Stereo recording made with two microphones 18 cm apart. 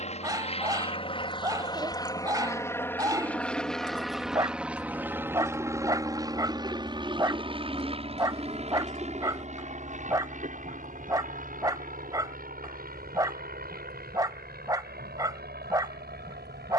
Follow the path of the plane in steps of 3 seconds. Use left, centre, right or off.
left, centre, right, right, right, right.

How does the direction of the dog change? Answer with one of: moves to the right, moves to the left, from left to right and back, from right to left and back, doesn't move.
doesn't move.